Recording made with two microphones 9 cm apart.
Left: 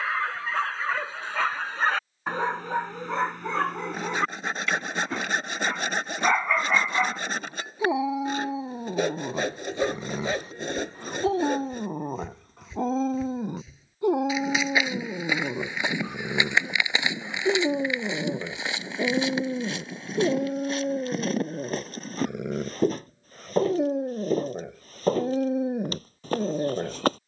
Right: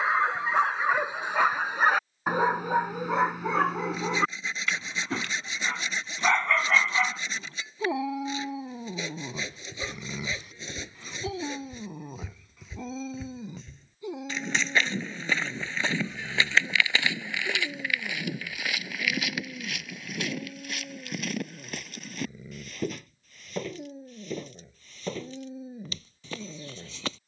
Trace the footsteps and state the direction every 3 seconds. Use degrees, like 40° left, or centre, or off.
off, off, off, 10° right, centre, 20° left, 30° left, 40° left, 40° left.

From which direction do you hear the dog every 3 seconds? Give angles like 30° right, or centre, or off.
20° right, centre, 20° left, 40° left, 50° left, 70° left, 80° left, 80° left, 80° left.